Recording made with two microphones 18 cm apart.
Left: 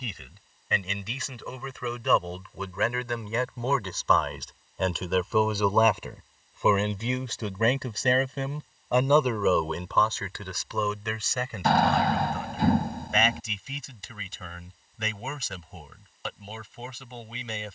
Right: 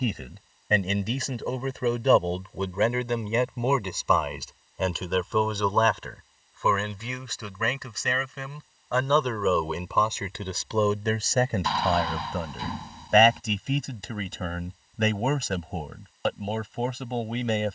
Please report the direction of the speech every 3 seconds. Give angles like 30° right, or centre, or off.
40° right, 10° right, 30° left, 20° right, 50° right, 50° right.